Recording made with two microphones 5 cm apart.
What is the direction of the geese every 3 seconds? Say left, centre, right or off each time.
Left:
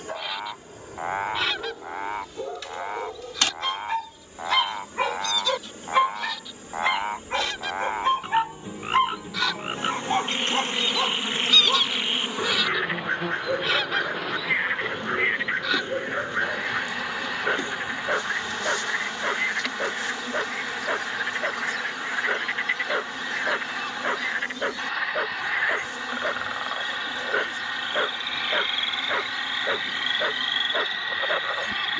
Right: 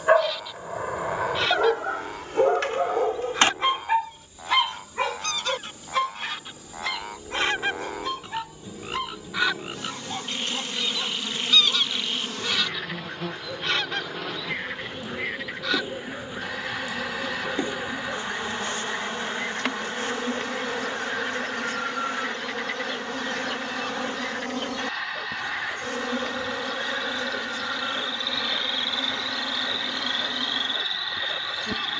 centre, right, right, centre, centre, centre, centre, centre, centre, centre, centre.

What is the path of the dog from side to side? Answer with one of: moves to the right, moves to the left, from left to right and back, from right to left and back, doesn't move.
moves to the left.